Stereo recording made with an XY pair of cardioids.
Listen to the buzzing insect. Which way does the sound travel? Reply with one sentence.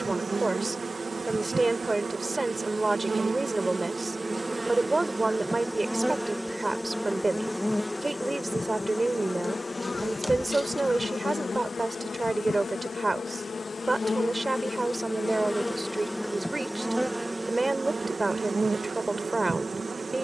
You can hear the buzzing insect move from right to left and back again.